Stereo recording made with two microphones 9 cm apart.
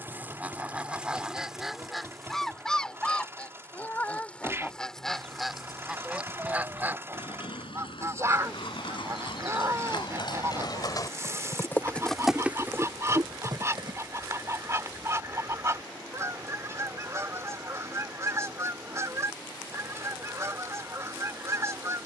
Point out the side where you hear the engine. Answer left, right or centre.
right.